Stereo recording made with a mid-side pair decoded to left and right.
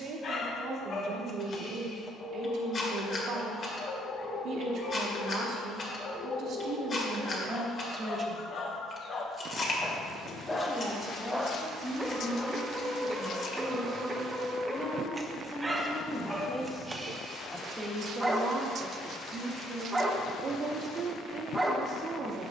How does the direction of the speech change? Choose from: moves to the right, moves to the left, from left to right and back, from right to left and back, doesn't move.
from right to left and back.